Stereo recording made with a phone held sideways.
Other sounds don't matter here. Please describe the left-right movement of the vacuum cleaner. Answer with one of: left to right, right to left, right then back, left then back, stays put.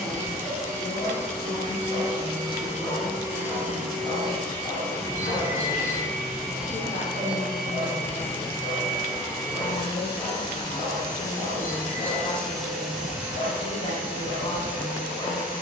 left then back.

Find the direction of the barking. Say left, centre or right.
left.